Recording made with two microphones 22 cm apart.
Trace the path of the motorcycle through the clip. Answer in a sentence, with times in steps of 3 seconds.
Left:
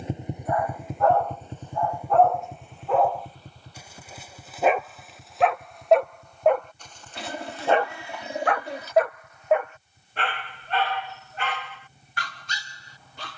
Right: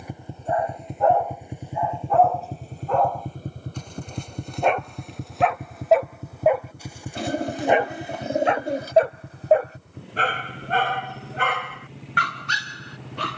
You can hear the motorcycle in the centre from 0 s and on the right from 3 s.